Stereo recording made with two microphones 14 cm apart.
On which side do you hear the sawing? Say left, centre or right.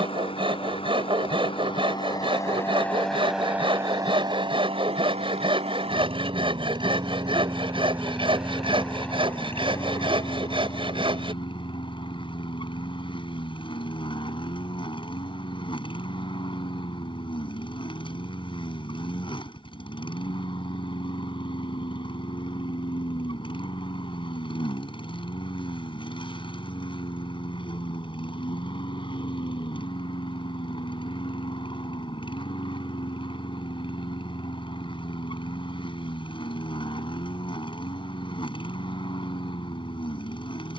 right.